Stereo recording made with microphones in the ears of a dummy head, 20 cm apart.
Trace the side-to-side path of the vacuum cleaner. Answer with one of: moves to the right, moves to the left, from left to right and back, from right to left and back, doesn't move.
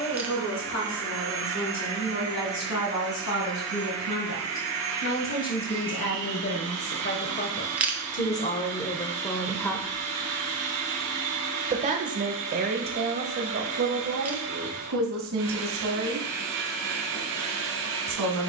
doesn't move.